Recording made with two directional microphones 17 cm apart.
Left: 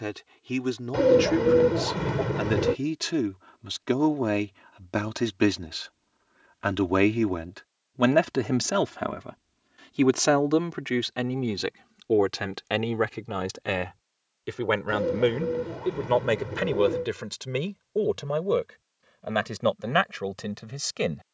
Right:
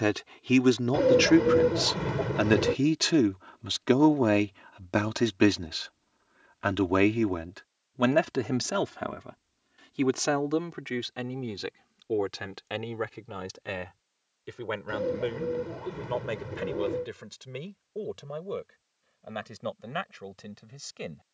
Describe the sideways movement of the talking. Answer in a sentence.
You can hear the talking move from right to left.